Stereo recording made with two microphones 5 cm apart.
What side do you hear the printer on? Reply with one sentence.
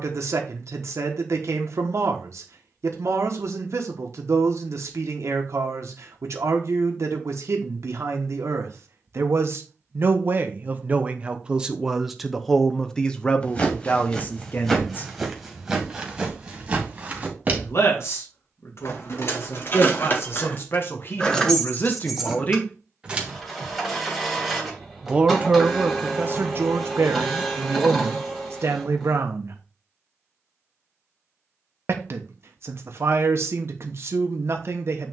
You can hear the printer in the centre.